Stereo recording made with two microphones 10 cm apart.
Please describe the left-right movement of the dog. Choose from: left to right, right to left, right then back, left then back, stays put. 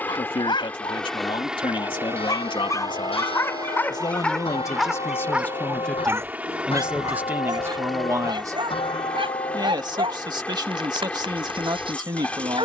left to right.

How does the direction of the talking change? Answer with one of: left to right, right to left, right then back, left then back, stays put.
left to right.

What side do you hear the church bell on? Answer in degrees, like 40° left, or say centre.
80° left.